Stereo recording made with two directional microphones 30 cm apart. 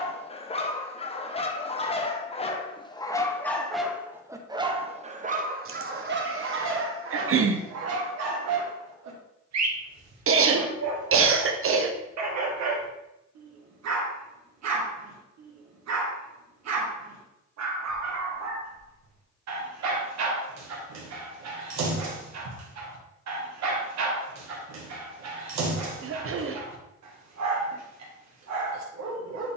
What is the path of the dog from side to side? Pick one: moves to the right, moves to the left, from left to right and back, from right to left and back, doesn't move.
moves to the right.